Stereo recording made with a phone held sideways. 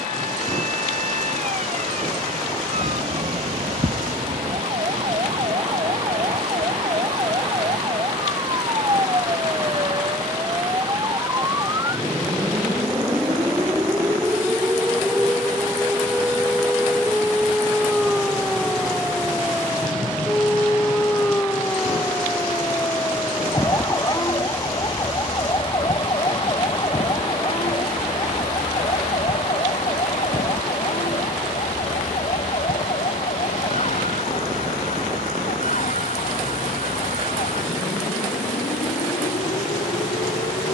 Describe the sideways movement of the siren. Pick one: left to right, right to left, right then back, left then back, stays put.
right to left.